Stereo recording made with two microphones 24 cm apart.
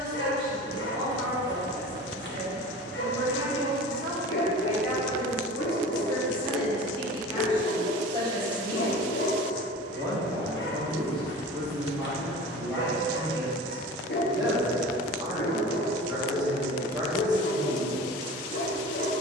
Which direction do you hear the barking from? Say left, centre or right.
left.